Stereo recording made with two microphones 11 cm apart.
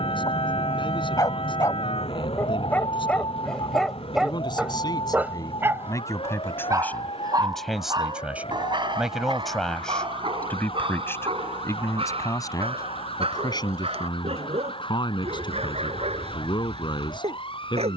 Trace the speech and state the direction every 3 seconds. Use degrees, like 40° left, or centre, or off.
50° left, 40° left, 10° left, 10° left, 40° left, 50° left.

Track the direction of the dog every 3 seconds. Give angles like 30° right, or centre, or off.
30° left, 10° right, 40° right, 50° right, 60° right, 70° right.